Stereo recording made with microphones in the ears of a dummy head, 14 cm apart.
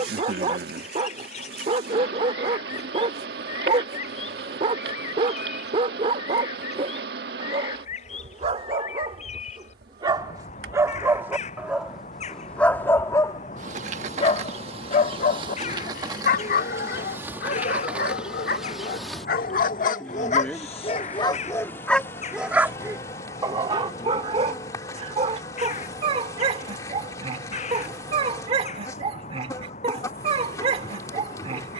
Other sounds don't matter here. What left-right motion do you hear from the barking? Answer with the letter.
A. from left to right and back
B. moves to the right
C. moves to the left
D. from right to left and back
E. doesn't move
D.